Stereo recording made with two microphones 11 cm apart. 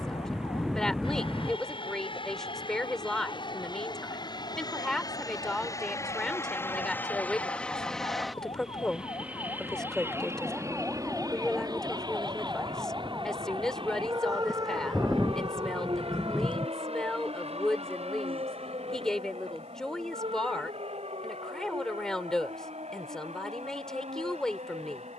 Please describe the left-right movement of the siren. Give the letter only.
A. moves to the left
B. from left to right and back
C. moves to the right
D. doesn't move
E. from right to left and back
C.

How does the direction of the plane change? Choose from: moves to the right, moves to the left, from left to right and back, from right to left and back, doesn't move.
moves to the right.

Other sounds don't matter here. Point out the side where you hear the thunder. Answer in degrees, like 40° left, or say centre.
centre.